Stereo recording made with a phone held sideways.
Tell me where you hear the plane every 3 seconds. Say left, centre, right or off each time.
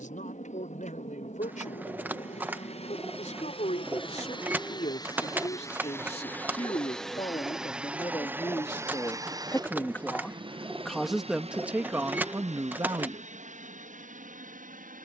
left, left, centre, right, right.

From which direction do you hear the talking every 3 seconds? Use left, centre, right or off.
left, left, left, centre, right.